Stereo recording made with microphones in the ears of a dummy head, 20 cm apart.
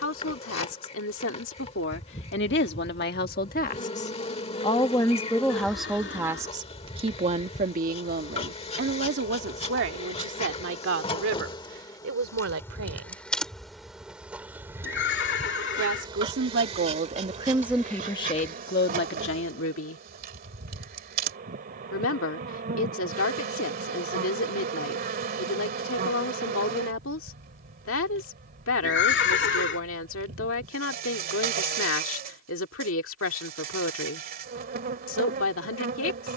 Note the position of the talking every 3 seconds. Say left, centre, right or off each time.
left, left, right, right, right, right, left, left, left, left, left, left.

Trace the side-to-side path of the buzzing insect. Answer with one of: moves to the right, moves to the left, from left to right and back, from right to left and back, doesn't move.
moves to the right.